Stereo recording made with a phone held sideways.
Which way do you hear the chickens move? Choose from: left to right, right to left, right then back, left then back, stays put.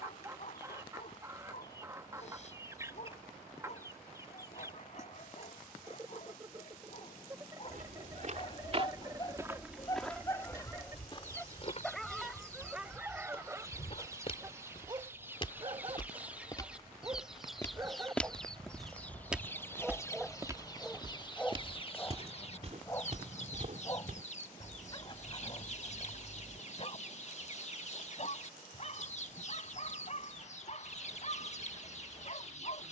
right to left.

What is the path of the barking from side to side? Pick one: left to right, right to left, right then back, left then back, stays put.
right then back.